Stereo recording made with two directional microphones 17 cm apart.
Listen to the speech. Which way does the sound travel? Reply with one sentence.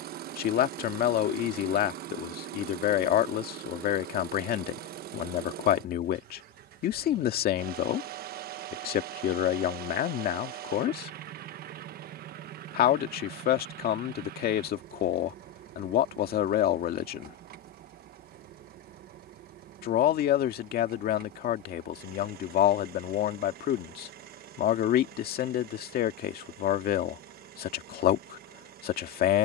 In this clip you hear the speech stay in one place.